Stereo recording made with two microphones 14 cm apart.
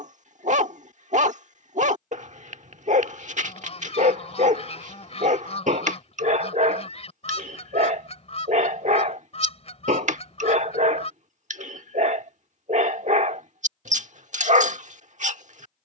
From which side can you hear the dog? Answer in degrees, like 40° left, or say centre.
60° right.